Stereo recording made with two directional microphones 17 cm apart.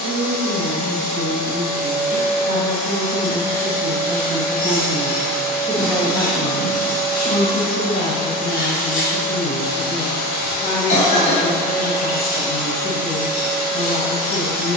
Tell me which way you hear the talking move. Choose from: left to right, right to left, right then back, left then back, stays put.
right to left.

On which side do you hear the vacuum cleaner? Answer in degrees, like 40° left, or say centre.
50° left.